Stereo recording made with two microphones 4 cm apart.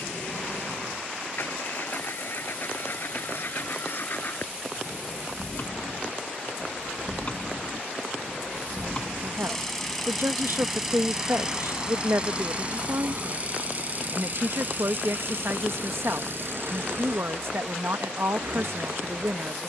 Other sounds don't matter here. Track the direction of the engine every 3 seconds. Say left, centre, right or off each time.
left, left, left, centre, right, right, right.